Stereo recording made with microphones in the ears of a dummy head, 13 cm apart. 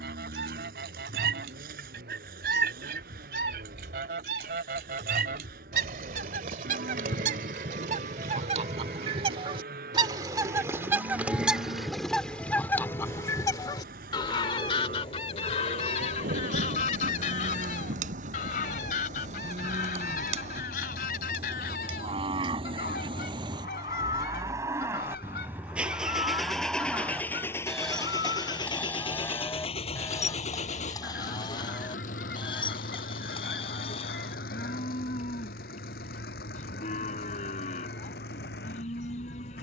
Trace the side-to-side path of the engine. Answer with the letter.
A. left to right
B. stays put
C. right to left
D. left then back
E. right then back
C.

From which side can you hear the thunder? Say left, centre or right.
right.